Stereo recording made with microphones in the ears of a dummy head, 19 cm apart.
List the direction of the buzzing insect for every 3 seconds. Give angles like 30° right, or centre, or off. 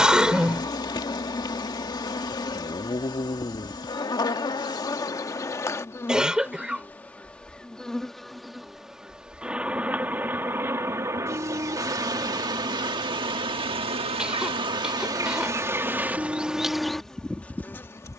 20° left, 20° left, centre, 10° right, 20° right, centre.